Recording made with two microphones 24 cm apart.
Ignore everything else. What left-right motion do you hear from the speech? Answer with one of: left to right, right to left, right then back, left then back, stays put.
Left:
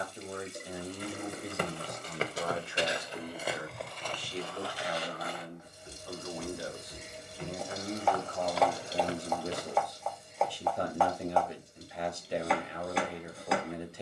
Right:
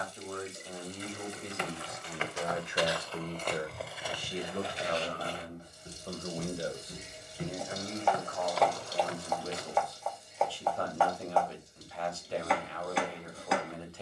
right then back.